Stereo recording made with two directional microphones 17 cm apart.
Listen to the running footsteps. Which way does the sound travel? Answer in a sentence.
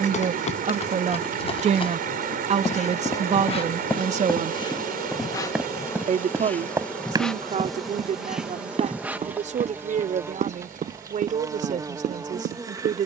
You can hear the running footsteps move to the right.